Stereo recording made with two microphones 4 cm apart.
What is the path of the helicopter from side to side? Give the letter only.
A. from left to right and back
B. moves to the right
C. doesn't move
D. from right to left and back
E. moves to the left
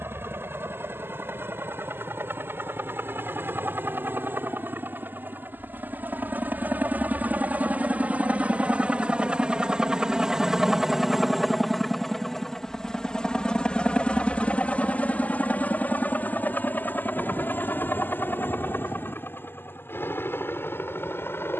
E.